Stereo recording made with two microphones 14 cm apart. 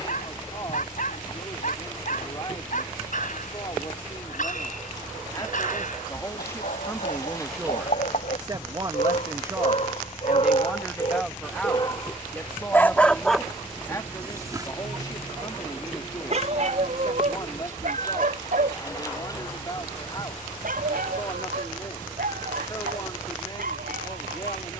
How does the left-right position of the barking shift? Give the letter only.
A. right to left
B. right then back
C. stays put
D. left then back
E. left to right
E.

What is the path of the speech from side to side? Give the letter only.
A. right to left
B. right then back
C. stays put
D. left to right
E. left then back
B.